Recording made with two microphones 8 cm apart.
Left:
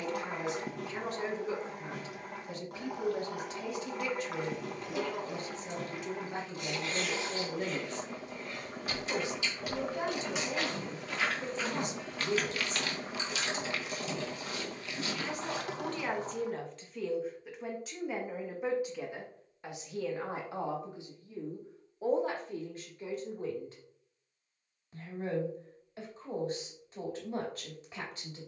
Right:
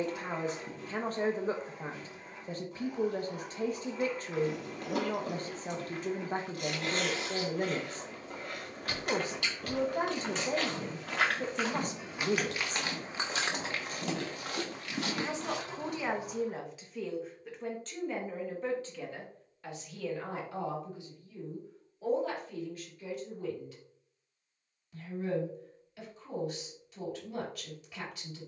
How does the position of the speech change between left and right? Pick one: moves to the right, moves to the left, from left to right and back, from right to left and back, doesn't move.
moves to the left.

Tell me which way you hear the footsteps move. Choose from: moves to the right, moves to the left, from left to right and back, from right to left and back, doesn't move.
moves to the right.